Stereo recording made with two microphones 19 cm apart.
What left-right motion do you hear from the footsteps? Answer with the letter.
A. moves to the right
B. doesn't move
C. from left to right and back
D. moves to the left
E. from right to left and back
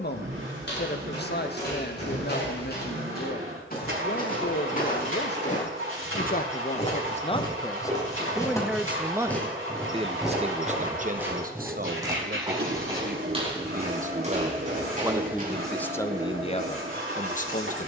A.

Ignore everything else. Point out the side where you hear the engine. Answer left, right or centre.
right.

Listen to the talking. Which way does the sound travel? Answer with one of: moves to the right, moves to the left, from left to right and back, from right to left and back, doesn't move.
from left to right and back.